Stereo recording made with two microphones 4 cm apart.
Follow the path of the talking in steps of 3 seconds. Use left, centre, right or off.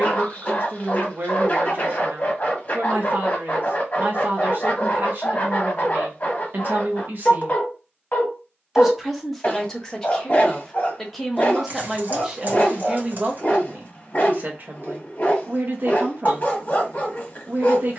right, right, right, centre, right, right.